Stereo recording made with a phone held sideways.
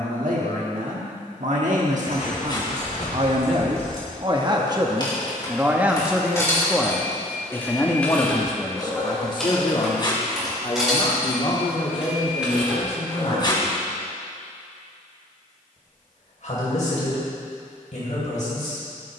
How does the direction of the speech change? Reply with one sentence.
In this clip you hear the speech go from the right side to the left.